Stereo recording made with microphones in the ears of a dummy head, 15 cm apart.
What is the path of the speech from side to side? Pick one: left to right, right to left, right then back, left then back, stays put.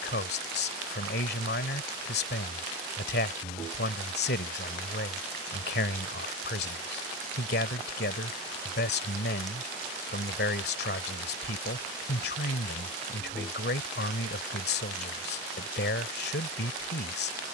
stays put.